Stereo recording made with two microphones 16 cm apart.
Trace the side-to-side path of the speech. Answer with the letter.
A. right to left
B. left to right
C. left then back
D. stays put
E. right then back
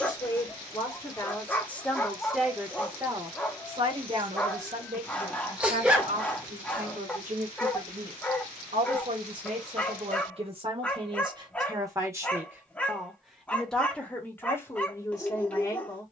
E.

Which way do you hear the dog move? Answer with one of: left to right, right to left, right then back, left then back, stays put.
stays put.